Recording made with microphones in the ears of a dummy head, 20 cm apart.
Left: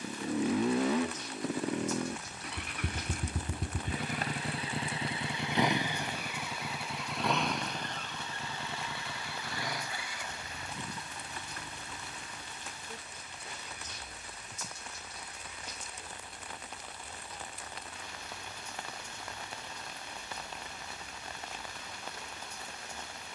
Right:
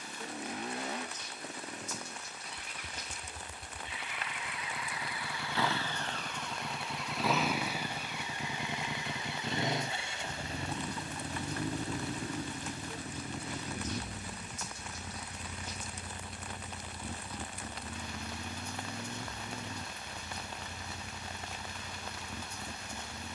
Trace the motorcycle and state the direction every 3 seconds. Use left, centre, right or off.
left, left, centre, right, right, right, right, right.